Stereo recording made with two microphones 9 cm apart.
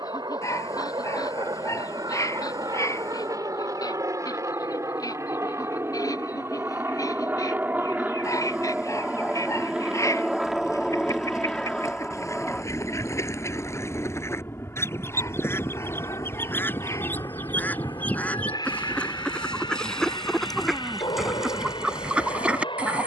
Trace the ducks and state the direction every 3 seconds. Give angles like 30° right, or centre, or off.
40° left, 40° left, 40° left, 40° left, 30° left, 20° left, 10° left, 10° right.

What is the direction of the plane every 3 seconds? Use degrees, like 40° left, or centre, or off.
50° right, 40° right, 20° right, centre, 20° left, 30° left, 50° left, 50° left.